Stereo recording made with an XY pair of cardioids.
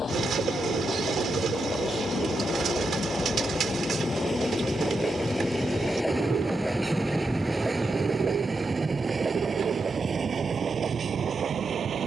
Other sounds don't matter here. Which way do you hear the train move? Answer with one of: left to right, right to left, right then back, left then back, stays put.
left to right.